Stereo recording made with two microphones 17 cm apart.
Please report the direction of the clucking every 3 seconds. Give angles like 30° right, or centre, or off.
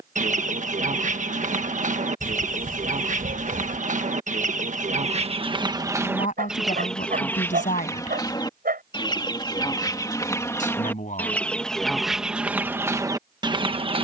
50° right, 40° right, 10° left, 20° left, 20° right.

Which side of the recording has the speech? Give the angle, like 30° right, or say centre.
50° left.